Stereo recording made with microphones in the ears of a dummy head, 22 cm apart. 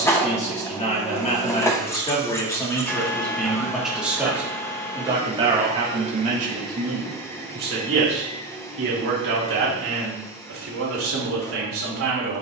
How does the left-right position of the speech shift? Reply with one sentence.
In this clip you hear the speech move to the right.